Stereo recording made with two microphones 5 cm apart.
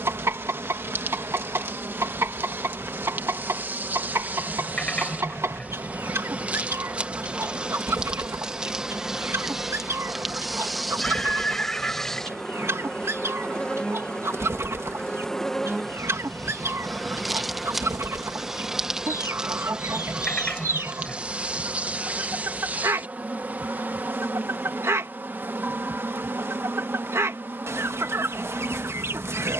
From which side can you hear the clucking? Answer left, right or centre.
right.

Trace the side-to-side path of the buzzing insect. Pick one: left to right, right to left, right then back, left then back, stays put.
left then back.